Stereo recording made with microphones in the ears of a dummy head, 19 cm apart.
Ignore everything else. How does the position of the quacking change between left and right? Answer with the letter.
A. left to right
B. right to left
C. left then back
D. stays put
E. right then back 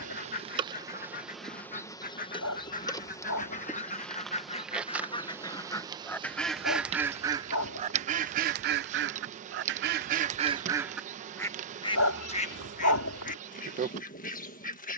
E.